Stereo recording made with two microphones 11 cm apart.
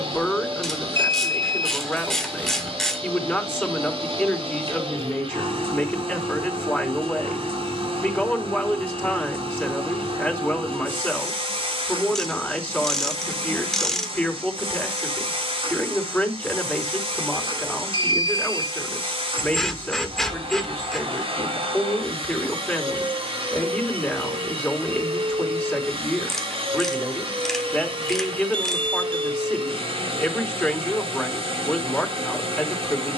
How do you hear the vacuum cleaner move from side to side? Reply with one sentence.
In this clip you hear the vacuum cleaner stay in one place.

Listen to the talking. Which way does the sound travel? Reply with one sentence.
You can hear the talking stay in one place.